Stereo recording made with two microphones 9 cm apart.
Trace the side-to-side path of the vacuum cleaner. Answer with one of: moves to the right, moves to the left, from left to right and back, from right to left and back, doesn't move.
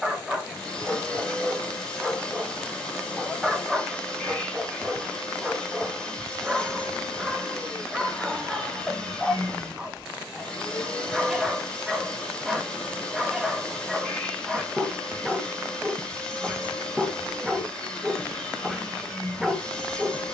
doesn't move.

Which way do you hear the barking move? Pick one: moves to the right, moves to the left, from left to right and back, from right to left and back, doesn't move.
doesn't move.